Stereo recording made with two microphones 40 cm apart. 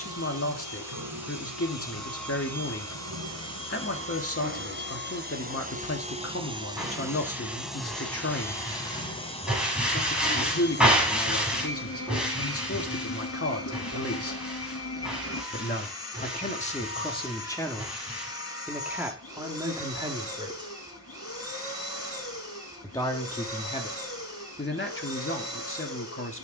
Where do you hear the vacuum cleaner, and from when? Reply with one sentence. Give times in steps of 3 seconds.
You can hear the vacuum cleaner on the right from 0 s, in the centre from 6 s and on the left from 9 s.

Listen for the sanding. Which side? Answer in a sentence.
You can hear the sanding in the centre.